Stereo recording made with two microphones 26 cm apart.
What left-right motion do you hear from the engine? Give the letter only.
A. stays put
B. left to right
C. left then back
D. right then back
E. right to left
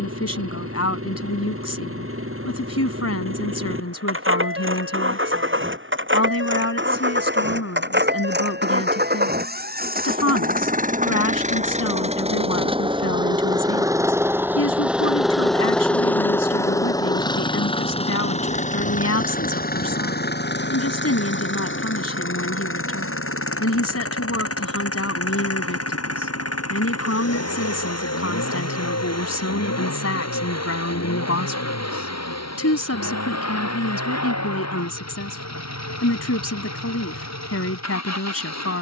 E.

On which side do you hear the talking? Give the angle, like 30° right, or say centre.
70° left.